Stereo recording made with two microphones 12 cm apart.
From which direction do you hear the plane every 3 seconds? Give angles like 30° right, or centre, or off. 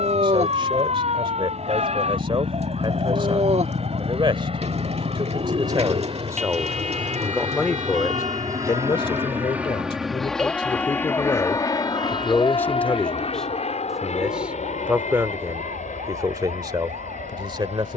70° right, 60° right, 40° right, 10° left, 50° left, 70° left.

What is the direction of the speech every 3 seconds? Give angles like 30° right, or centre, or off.
40° right, 40° right, centre, 40° left, 10° left, 30° right.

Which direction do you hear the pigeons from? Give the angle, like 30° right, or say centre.
60° right.